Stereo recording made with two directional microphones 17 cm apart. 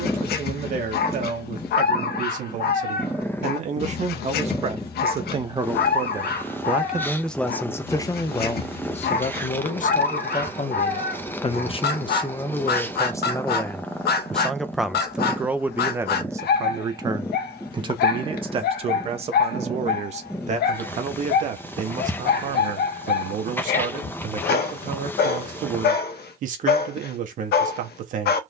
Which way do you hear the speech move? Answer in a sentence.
In this clip you hear the speech go left and come back.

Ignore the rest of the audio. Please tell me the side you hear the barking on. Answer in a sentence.
You can hear the barking on the left.